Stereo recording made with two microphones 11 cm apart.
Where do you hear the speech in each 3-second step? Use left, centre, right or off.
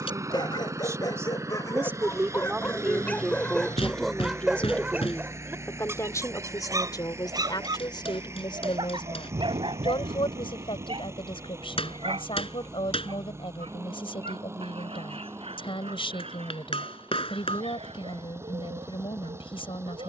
right, centre, left, left, left, left, left.